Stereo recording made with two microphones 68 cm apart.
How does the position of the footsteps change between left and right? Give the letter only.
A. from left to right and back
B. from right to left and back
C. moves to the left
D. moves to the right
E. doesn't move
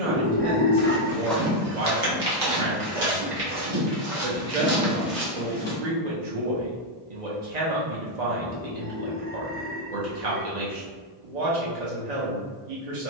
A.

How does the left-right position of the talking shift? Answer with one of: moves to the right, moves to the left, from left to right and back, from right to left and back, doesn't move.
doesn't move.